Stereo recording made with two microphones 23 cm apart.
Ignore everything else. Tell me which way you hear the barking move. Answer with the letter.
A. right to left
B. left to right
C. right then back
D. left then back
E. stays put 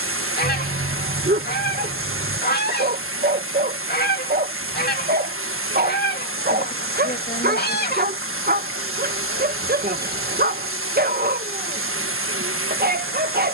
E.